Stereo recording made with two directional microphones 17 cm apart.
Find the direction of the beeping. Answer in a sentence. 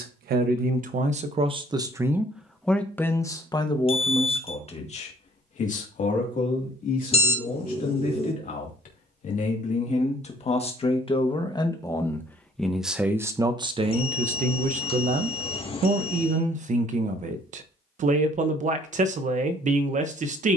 In this clip you hear the beeping on the left.